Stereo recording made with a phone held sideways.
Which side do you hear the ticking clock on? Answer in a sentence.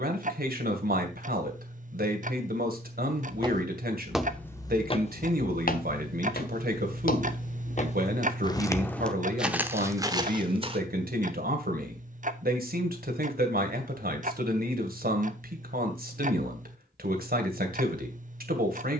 In this clip you hear the ticking clock on the right.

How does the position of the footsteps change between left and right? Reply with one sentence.
In this clip you hear the footsteps move from right to left and back again.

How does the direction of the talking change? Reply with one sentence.
You can hear the talking stay put.